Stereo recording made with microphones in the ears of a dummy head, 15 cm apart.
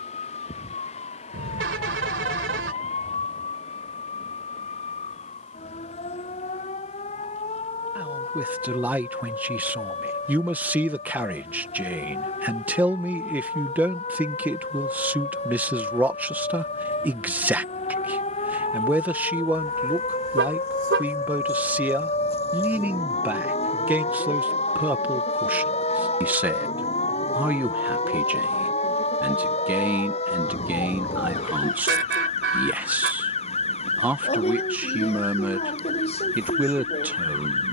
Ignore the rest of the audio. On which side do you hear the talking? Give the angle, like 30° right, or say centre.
10° right.